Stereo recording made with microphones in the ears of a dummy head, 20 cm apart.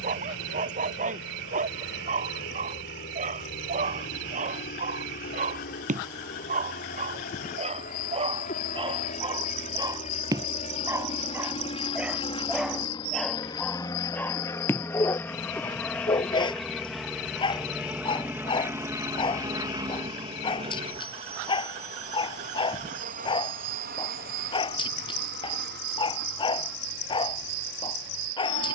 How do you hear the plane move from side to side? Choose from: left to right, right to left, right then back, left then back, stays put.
left to right.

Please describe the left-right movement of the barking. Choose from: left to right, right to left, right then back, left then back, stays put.
right to left.